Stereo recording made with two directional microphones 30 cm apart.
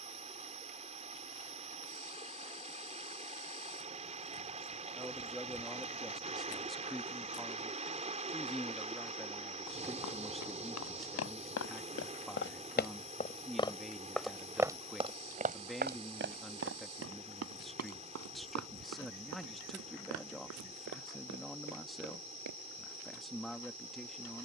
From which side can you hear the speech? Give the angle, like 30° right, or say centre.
centre.